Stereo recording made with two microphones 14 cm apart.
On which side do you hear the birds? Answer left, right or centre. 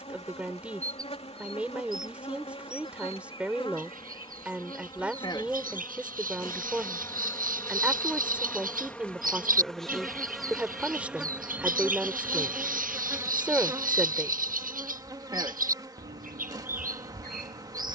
right.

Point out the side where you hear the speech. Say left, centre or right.
centre.